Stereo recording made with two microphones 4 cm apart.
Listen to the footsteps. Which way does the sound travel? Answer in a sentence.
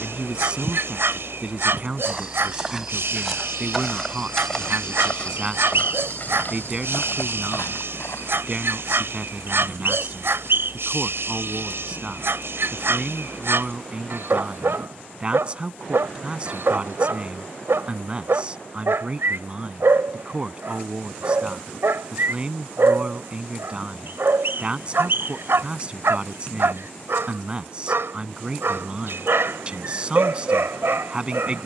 In this clip you hear the footsteps move to the left.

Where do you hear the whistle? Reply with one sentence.
In this clip you hear the whistle on the right.